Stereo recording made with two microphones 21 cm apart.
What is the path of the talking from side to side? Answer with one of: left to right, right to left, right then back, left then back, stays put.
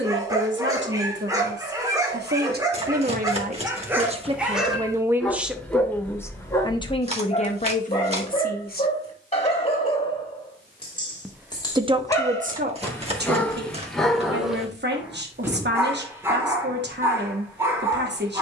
left then back.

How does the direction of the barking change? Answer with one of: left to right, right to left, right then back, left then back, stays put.
left then back.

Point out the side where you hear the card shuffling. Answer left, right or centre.
right.